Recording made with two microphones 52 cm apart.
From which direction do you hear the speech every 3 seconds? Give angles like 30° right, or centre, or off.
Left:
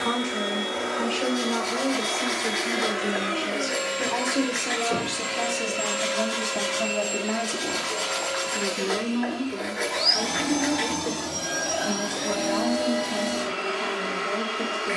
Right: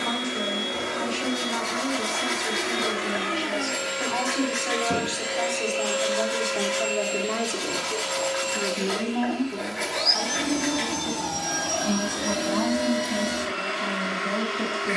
70° left, 50° left, 20° left, 20° right, 40° right.